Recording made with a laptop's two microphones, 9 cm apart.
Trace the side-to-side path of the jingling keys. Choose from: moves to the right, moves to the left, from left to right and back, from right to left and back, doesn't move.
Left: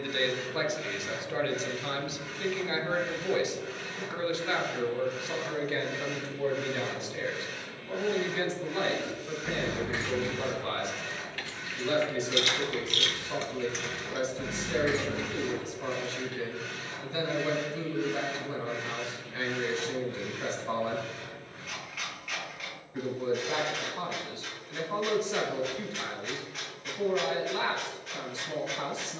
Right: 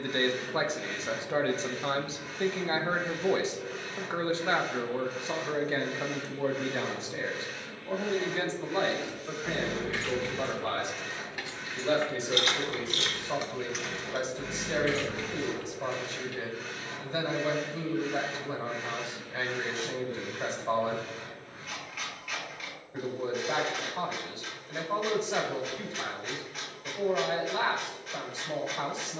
from left to right and back.